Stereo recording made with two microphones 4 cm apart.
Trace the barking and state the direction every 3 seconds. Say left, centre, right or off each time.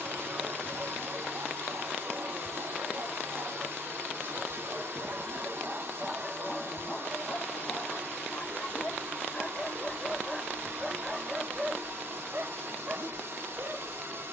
right, right, left, centre, right.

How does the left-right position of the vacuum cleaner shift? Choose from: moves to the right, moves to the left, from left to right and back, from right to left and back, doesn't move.
doesn't move.